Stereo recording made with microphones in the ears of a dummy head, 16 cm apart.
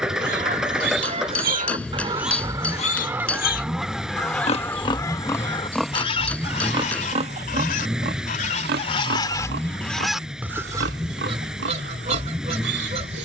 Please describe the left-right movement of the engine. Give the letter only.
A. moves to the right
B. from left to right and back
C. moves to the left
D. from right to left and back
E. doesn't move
E.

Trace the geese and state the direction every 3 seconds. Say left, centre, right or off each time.
right, centre, left, centre, right.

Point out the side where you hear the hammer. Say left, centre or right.
centre.